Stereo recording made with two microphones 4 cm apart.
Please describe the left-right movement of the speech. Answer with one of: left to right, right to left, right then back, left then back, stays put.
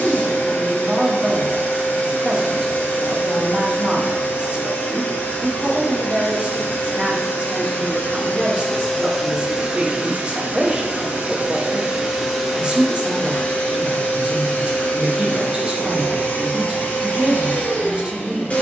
stays put.